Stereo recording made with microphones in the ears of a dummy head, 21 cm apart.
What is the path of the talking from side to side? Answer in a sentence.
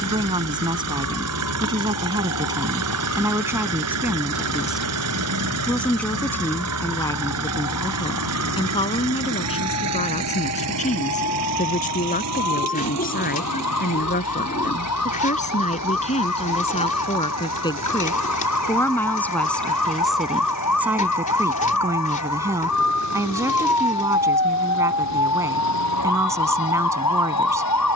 In this clip you hear the talking move from right to left and back again.